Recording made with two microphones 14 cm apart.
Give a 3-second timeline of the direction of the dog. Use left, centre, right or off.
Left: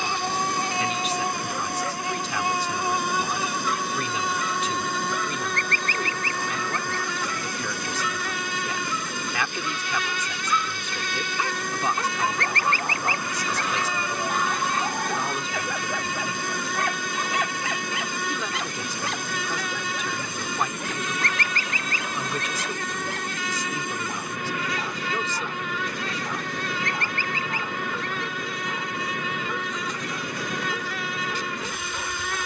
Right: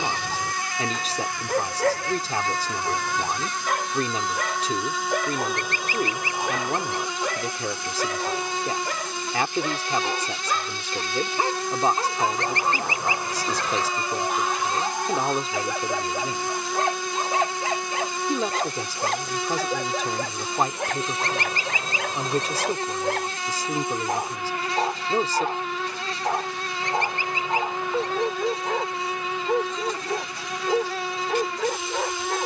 right, right, right, right, centre, right, right, right, right, right, right.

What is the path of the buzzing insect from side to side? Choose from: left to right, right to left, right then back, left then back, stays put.
left to right.